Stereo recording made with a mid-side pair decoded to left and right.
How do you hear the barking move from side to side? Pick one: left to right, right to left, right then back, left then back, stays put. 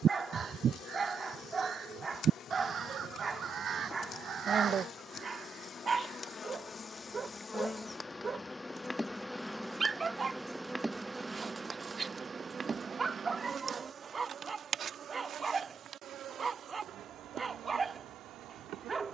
stays put.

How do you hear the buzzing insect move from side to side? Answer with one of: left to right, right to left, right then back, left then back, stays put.
left to right.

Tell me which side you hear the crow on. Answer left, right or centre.
right.